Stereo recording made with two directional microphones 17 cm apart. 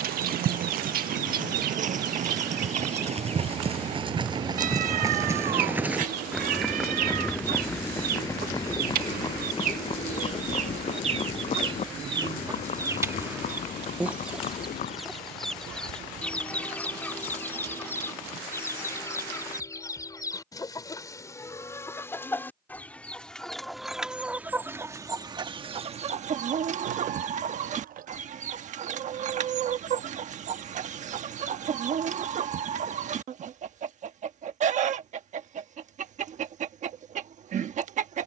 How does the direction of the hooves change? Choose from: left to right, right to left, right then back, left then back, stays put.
right to left.